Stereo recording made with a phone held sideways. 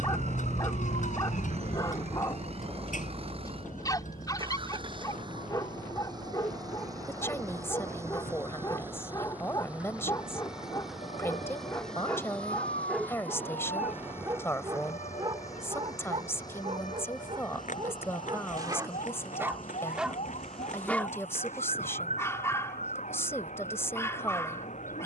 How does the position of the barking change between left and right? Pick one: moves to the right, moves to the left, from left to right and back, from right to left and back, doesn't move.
from left to right and back.